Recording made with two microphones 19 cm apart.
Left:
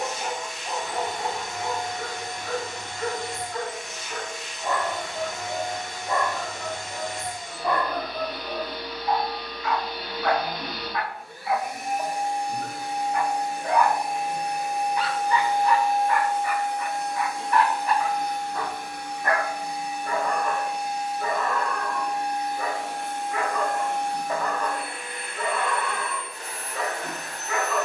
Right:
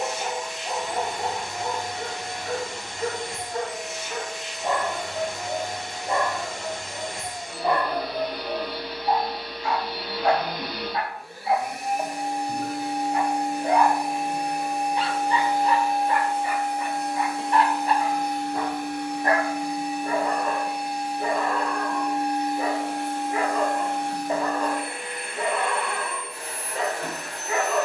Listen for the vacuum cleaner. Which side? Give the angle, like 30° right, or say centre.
70° right.